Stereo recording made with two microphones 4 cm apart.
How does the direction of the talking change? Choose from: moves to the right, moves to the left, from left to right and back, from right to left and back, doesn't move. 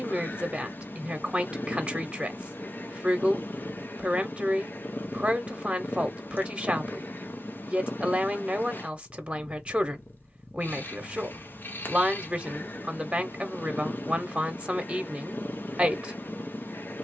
doesn't move.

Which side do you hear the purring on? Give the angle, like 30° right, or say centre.
50° left.